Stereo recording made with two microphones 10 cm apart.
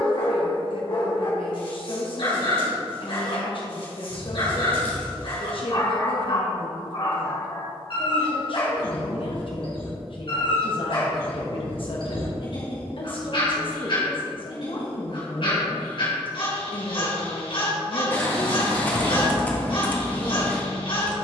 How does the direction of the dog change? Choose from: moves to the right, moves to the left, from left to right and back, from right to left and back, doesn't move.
doesn't move.